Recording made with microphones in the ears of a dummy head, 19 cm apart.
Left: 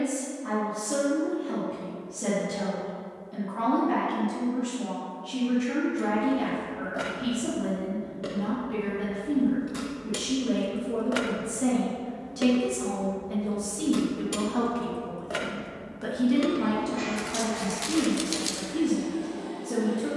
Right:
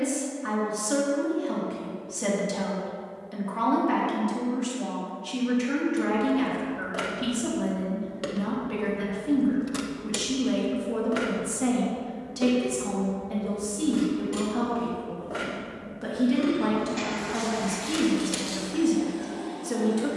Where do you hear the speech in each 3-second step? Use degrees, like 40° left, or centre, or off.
50° right, 50° right, 50° right, 40° right, centre, 10° right, 50° right.